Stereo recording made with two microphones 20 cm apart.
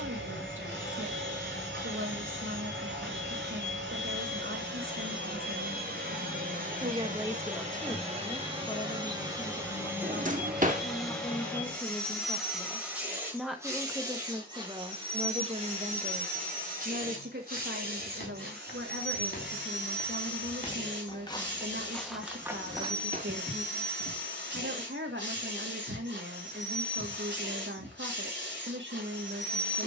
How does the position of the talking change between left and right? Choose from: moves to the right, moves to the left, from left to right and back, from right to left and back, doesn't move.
from right to left and back.